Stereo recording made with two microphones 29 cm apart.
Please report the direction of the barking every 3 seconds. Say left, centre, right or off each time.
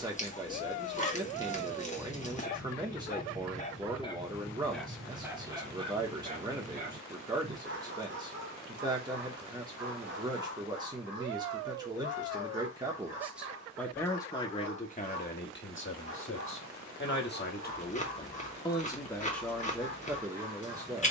left, centre, right, right, right, right, right.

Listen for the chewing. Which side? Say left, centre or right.
left.